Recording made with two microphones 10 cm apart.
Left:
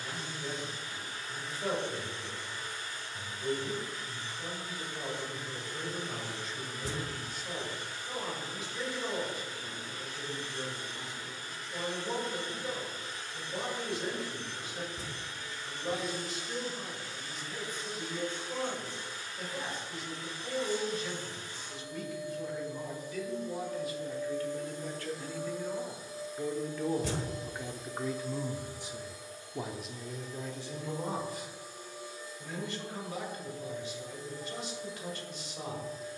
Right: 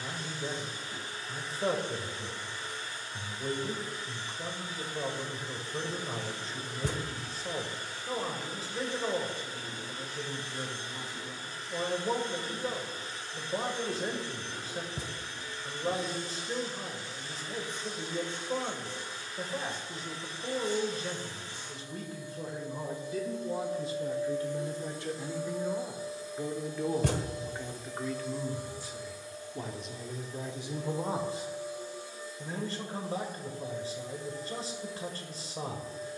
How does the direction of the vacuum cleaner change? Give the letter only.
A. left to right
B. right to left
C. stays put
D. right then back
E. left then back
C.